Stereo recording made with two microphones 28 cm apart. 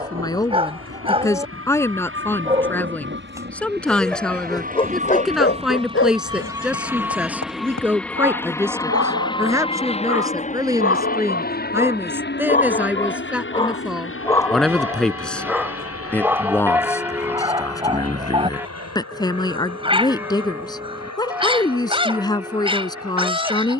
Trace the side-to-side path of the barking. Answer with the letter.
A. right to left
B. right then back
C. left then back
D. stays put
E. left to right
C.